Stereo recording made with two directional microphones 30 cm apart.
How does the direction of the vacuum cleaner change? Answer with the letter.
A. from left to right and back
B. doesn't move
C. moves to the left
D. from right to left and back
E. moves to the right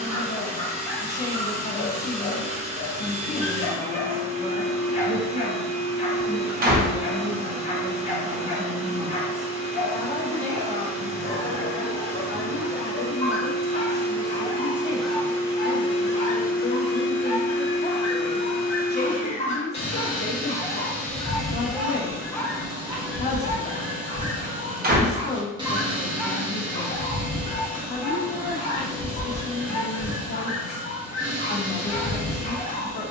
D.